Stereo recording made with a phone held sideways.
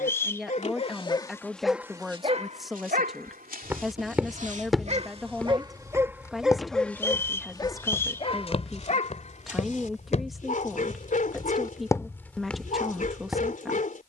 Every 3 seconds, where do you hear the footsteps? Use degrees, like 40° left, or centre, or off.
off, centre, 30° left, 40° left, centre.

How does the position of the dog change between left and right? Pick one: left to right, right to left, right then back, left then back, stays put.
right then back.